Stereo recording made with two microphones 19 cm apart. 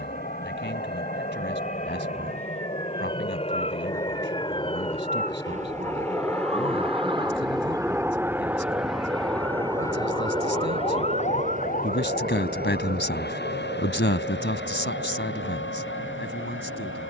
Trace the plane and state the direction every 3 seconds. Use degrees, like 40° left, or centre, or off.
50° left, 30° left, centre, 30° right, 50° right, 60° right.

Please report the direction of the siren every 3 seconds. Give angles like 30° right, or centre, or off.
60° right, 50° right, 20° right, 20° left, 60° left, 70° left.